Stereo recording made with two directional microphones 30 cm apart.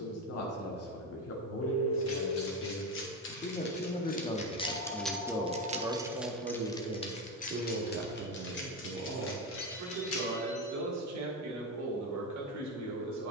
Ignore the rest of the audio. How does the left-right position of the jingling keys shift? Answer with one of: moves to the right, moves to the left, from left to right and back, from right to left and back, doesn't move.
from left to right and back.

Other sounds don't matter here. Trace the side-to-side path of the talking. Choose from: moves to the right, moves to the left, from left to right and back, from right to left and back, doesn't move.
moves to the right.